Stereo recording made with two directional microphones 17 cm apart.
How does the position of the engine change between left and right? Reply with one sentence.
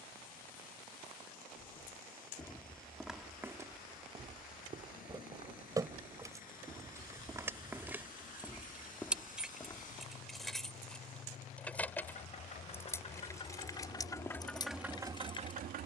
In this clip you hear the engine move to the right.